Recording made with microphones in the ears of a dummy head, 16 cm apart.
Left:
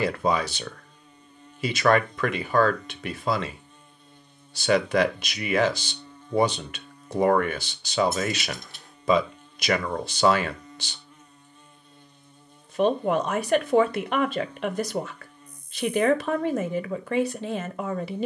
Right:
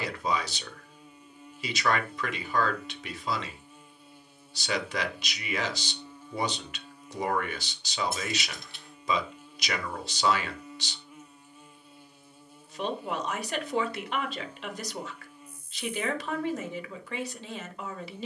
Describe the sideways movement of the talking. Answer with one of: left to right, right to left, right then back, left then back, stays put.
stays put.